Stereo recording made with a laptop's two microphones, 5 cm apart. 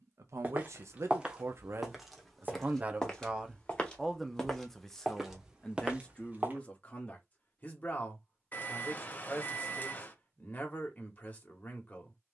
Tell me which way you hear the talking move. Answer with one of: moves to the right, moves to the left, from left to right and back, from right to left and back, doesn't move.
moves to the left.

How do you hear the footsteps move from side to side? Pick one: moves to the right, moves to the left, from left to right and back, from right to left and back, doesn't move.
from right to left and back.